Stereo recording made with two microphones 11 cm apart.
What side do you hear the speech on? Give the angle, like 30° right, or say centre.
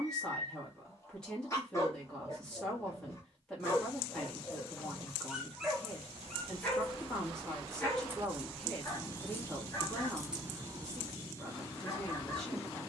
10° left.